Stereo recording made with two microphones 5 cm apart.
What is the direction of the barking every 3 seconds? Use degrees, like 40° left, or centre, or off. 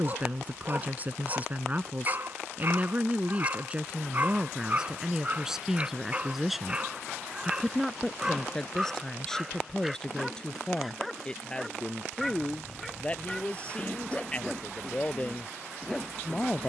40° right, 30° right, 20° right, centre, 10° left, 10° left.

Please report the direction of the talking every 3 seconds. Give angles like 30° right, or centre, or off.
30° right, 20° right, centre, 20° left, 20° left, 30° left.